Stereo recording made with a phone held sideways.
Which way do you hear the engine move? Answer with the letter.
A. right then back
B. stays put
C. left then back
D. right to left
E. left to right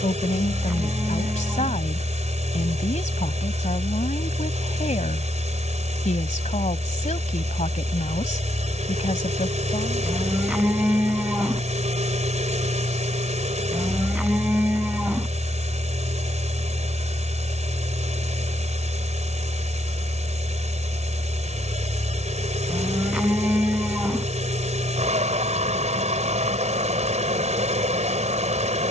B.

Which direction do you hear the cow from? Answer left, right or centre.
centre.